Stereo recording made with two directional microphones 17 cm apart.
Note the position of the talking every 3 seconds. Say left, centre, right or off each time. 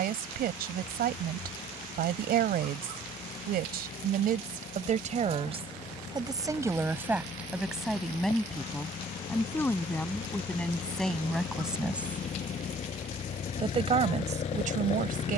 right, right, centre, centre, right.